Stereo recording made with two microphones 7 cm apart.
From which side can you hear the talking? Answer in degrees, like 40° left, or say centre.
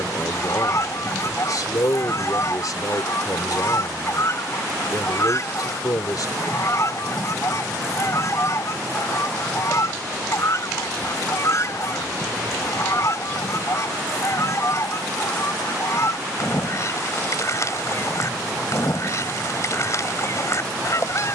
60° left.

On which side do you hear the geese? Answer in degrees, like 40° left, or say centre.
40° left.